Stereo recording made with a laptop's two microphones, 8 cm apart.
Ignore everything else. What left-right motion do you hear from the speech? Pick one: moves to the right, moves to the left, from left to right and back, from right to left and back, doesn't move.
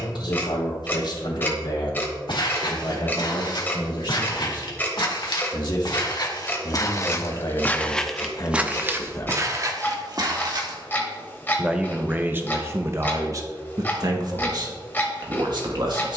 moves to the right.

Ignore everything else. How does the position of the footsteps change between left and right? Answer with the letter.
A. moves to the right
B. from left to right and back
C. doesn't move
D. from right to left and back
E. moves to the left
A.